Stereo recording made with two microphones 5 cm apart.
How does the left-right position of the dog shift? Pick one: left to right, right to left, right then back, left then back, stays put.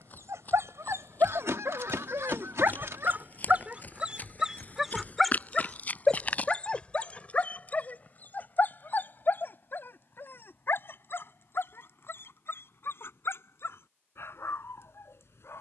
right to left.